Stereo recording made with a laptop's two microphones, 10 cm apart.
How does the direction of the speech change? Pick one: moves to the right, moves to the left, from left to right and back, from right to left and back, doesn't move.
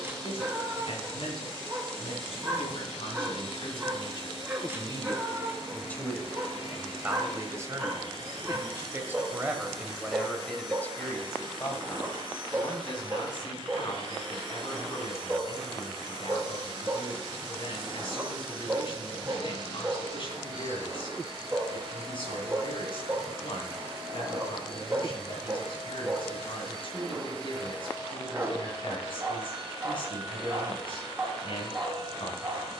from left to right and back.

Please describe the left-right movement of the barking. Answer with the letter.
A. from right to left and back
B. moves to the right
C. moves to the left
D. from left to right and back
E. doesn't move
E.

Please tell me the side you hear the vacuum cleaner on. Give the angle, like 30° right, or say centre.
50° right.